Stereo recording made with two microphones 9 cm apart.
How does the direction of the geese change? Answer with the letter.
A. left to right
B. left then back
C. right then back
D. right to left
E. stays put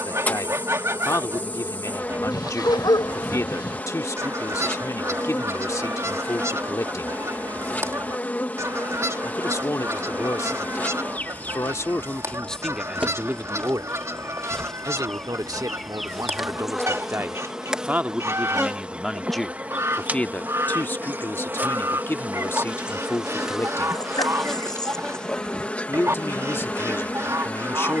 E.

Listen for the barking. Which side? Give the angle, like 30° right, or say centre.
50° left.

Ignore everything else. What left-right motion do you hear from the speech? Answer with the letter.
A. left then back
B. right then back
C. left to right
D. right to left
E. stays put
B.